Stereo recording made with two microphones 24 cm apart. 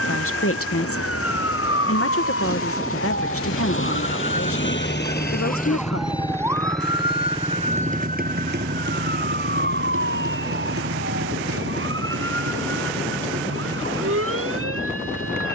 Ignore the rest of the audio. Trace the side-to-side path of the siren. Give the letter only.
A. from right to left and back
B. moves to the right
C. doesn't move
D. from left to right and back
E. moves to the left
B.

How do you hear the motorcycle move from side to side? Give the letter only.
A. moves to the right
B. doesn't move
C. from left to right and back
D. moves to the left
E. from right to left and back
A.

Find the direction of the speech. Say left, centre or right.
left.